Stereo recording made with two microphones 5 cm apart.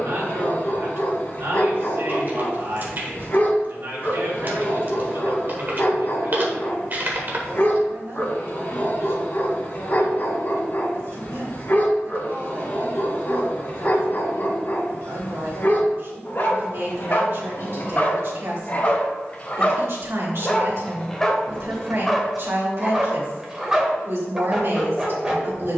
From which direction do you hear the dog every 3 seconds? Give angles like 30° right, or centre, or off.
50° left, 50° left, 50° left, 50° left, 50° left, 50° left, 30° left, centre, 10° right.